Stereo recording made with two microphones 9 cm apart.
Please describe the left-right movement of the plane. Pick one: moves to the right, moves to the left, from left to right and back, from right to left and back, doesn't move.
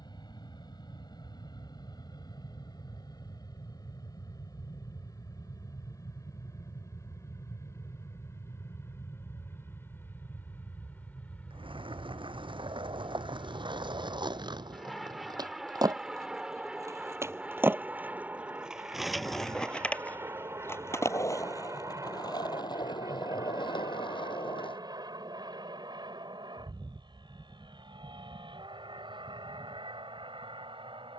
moves to the right.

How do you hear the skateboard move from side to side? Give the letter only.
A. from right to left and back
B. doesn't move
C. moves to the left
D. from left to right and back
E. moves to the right
C.